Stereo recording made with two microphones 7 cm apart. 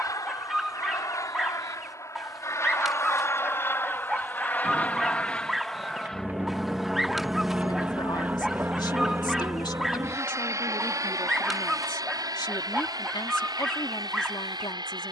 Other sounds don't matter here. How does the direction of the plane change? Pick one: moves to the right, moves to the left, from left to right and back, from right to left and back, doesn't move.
moves to the right.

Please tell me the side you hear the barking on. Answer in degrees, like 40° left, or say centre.
centre.